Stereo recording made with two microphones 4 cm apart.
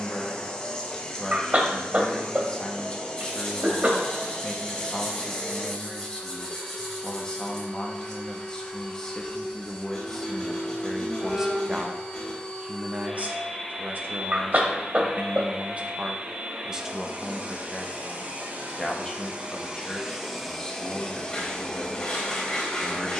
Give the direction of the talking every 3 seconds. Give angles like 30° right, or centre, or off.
20° left, 20° left, 20° left, centre, 40° right, 20° right, 20° left, 20° left.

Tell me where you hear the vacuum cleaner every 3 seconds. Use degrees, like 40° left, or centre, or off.
20° left, 20° left, 20° left, 20° left, centre, 20° right, 20° right, 20° left.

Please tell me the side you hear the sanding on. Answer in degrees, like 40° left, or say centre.
20° left.